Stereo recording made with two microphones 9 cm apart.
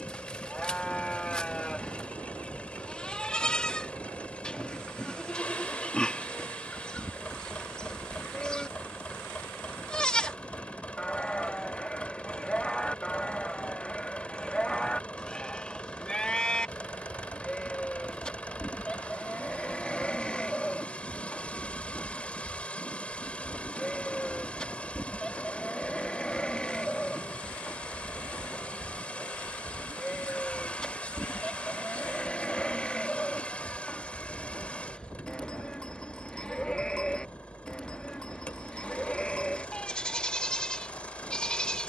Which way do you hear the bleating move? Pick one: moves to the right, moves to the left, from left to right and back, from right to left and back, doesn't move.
doesn't move.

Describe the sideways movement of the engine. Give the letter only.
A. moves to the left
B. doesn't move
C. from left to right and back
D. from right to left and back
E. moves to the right
B.